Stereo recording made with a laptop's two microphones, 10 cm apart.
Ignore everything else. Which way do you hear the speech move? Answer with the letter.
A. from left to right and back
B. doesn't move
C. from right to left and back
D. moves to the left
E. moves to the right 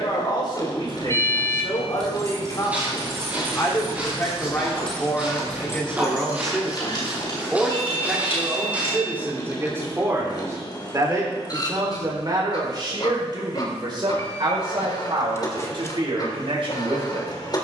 E.